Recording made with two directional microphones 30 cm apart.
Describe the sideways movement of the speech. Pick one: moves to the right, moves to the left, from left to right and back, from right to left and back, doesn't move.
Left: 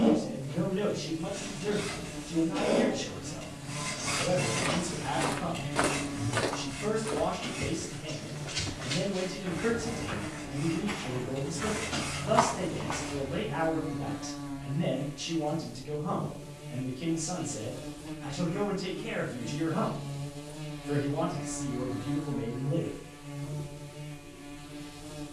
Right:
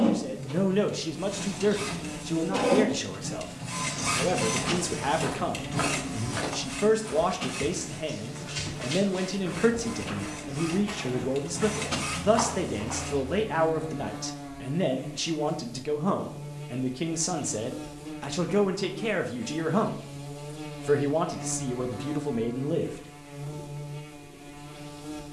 doesn't move.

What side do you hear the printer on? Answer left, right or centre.
right.